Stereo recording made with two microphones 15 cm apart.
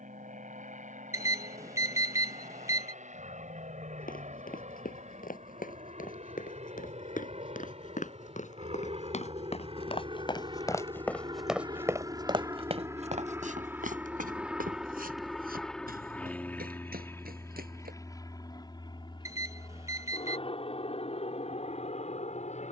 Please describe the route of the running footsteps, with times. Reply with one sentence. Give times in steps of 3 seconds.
In this clip you hear the running footsteps not at all from 0 s, on the left from 3 s, on the right from 12 s and not at all from 18 s.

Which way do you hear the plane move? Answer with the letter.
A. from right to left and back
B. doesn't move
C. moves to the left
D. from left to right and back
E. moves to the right
C.